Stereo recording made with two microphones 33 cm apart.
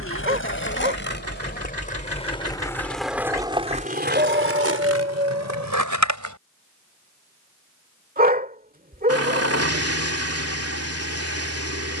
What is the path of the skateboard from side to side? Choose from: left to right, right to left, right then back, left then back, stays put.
left to right.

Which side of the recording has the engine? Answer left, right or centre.
right.